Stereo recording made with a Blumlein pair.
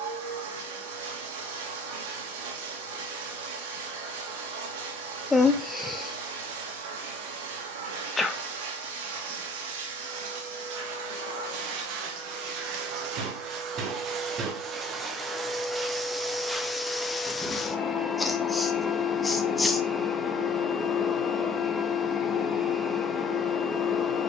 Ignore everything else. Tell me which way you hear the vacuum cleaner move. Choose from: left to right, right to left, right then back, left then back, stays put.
right to left.